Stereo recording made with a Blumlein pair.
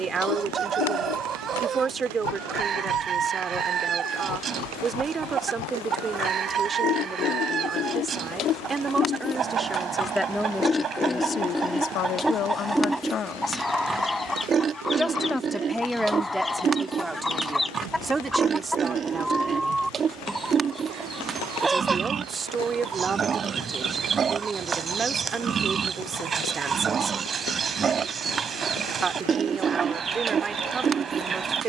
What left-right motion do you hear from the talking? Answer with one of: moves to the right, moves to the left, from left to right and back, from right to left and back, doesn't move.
from right to left and back.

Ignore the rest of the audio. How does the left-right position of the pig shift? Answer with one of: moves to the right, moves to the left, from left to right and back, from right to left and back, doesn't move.
moves to the right.